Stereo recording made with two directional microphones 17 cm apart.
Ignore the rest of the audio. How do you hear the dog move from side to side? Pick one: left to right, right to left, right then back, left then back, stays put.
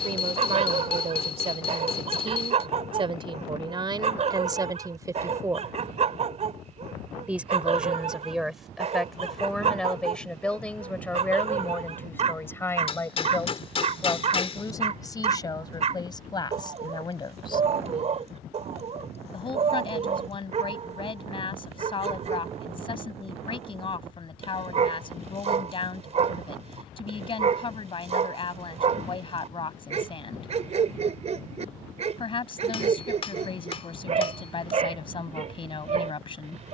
stays put.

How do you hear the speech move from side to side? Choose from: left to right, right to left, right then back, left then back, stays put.
right to left.